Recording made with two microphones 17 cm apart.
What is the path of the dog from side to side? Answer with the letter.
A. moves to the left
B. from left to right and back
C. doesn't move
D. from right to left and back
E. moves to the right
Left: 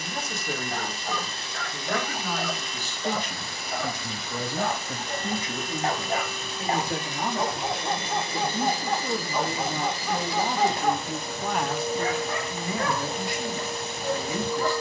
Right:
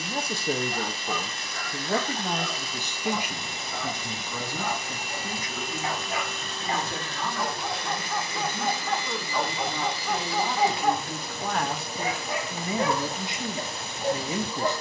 E.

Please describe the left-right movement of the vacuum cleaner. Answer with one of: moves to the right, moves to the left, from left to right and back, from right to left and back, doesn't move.
from left to right and back.